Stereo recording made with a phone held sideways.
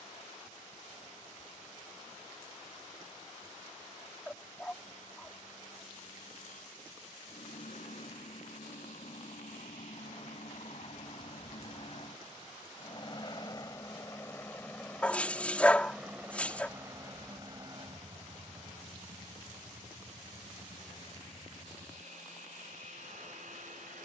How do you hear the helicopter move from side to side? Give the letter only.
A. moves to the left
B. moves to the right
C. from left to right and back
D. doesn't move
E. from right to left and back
B.